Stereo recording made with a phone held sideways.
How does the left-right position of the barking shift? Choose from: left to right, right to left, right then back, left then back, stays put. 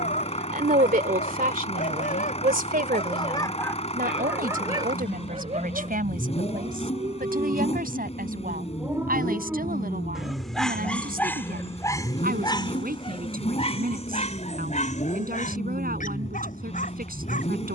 right then back.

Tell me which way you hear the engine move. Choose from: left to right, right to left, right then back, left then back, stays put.
stays put.